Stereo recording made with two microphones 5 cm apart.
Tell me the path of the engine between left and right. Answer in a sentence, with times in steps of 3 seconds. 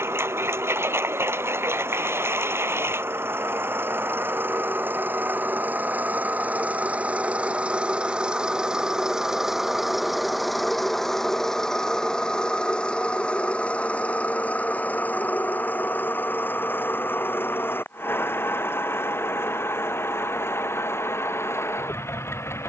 In this clip you hear the engine on the right from 0 s, in the centre from 9 s and on the left from 12 s.